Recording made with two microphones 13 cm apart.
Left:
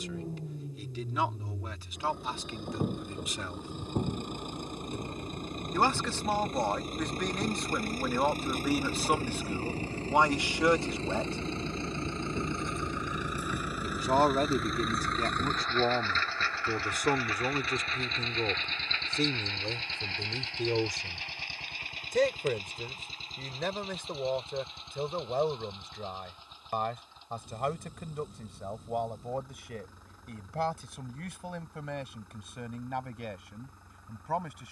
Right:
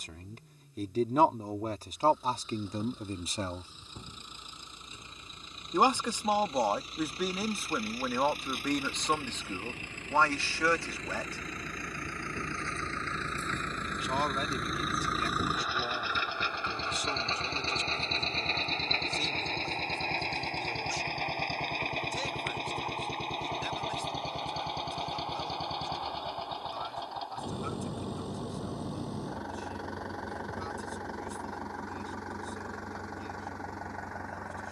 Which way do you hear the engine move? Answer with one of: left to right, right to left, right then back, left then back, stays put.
left to right.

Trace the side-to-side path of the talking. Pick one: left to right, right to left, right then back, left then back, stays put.
right to left.